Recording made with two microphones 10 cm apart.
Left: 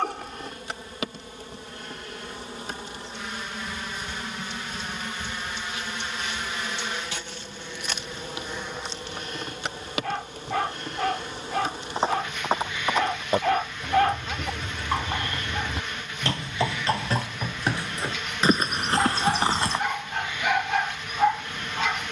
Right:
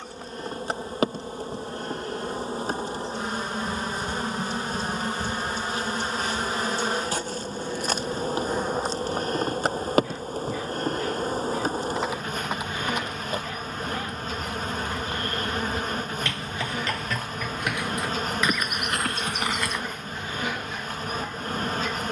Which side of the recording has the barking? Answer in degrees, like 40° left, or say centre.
80° left.